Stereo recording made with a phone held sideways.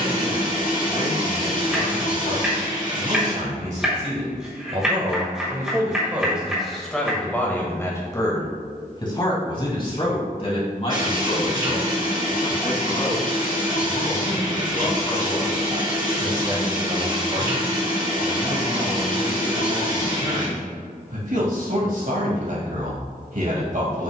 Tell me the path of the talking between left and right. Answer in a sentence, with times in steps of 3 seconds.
You can hear the talking on the right from 0 s, in the centre from 6 s, on the left from 9 s and on the right from 15 s.